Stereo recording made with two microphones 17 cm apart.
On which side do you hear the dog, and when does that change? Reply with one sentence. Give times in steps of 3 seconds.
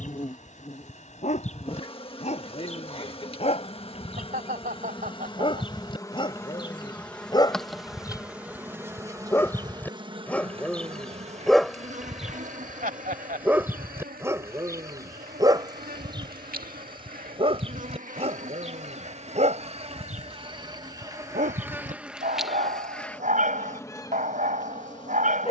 You can hear the dog on the left from 0 s, in the centre from 9 s and on the right from 15 s.